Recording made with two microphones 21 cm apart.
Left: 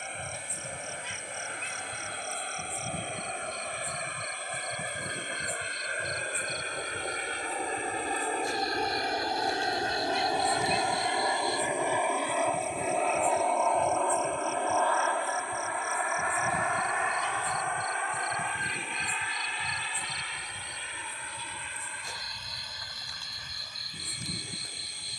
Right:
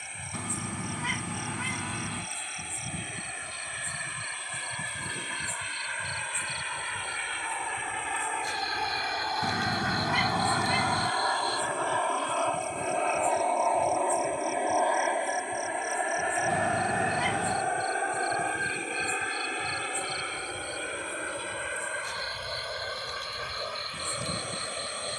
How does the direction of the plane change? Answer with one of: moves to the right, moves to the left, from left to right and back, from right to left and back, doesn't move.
moves to the right.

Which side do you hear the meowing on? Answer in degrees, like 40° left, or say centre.
70° right.